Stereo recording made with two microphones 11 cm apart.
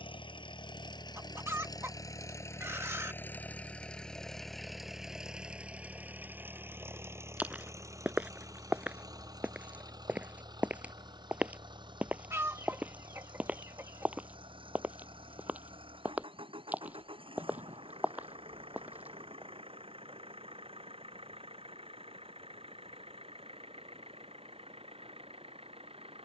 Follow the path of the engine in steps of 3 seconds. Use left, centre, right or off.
left, centre, right, right, right, right, right, right, right.